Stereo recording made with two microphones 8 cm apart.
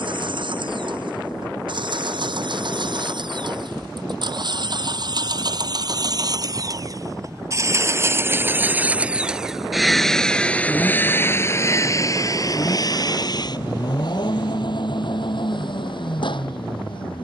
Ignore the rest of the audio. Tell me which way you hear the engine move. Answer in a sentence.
In this clip you hear the engine move to the left.